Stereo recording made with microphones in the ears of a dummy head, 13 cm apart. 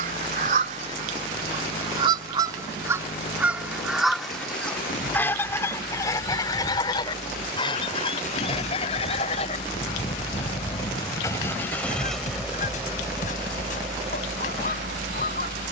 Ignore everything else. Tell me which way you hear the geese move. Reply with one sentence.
You can hear the geese travel towards the left.